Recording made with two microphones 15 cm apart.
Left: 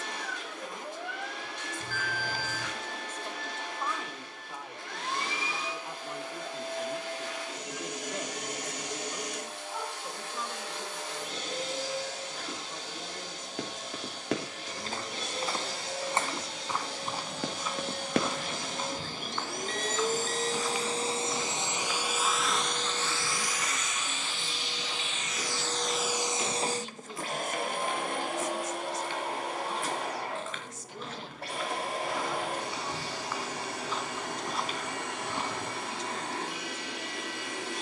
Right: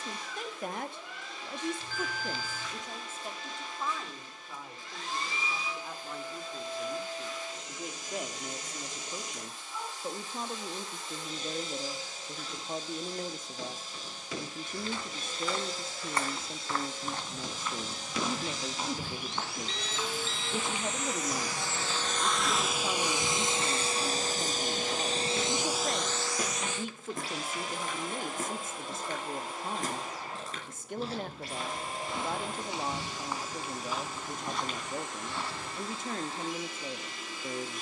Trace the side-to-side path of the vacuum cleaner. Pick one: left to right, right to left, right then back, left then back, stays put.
right then back.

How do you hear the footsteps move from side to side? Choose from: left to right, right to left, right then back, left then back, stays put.
right then back.